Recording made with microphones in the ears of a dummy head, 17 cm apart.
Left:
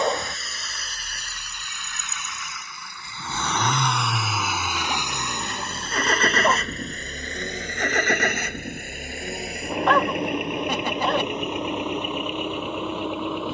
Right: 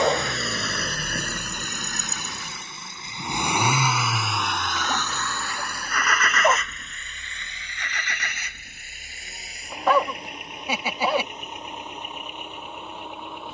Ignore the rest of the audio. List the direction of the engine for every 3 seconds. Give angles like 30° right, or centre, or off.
40° right, centre, 40° left, 50° left, 60° left.